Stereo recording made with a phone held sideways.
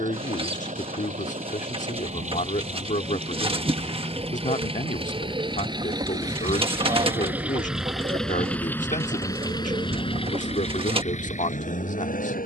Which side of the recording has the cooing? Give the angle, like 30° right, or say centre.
30° right.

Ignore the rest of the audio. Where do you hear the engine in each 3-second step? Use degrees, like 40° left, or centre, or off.
50° right, 40° right, 10° right, 40° left.